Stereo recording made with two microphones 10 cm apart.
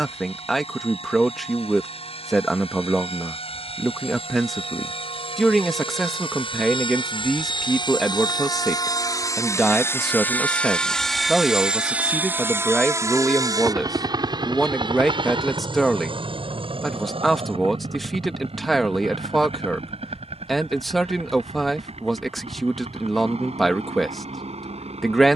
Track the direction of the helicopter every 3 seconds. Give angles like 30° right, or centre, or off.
80° left, 70° left, 50° left, 10° left, 30° right, 50° right, 60° right, 70° right, 70° right.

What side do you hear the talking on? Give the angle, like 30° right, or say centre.
centre.